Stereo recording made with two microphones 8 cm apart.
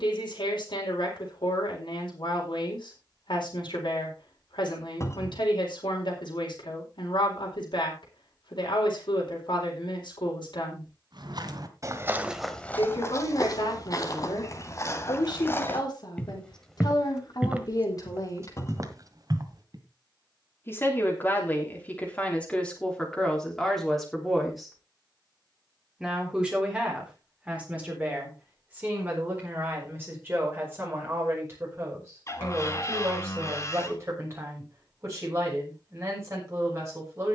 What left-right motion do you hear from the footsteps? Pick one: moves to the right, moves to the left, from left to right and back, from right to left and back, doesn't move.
from right to left and back.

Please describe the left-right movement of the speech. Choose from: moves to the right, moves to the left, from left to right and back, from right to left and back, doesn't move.
moves to the right.